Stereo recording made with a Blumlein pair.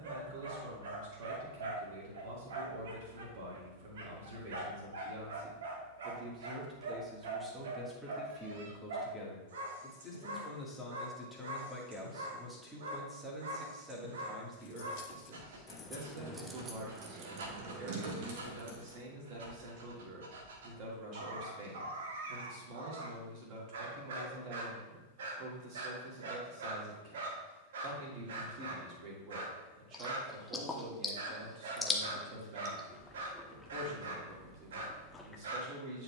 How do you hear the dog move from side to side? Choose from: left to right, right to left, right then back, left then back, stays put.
stays put.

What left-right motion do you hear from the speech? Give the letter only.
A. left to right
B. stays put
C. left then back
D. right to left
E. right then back
C.